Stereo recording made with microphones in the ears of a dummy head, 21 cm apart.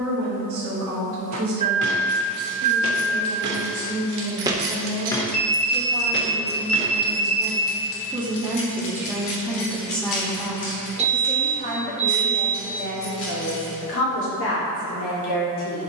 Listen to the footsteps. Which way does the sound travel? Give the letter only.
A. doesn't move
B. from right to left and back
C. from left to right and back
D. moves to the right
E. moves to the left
E.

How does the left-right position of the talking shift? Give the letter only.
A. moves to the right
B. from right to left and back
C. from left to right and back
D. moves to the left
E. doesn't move
D.